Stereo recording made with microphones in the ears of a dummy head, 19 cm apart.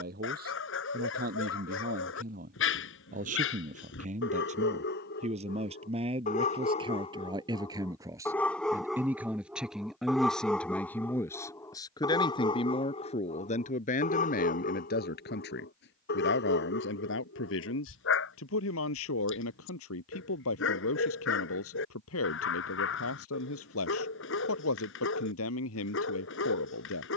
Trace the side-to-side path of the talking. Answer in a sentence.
You can hear the talking go from the right side to the left.